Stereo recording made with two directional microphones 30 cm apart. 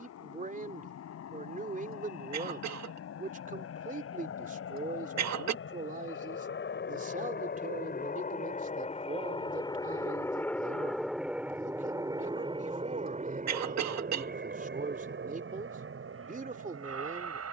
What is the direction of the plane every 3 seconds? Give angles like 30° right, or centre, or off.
60° left, 50° left, 40° left, 10° left, 20° right, 40° right.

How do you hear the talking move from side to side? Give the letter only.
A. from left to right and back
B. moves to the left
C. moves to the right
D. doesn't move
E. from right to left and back
D.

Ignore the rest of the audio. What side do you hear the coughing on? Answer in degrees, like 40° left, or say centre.
60° right.